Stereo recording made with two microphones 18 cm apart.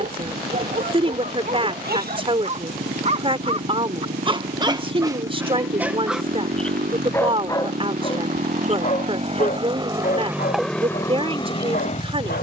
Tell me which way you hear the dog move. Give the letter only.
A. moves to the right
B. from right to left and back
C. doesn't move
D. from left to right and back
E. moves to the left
E.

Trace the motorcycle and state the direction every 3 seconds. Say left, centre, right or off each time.
right, right, right, centre.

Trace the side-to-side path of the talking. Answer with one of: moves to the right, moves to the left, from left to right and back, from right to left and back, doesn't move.
doesn't move.